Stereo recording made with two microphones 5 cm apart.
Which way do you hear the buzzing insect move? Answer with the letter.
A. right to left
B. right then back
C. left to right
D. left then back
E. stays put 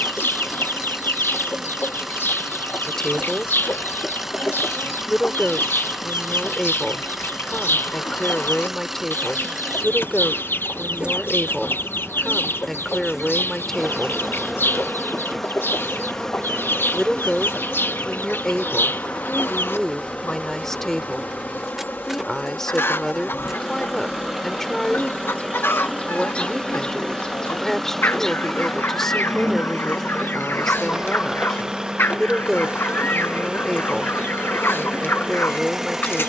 D.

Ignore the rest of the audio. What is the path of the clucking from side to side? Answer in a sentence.
You can hear the clucking stay in one place.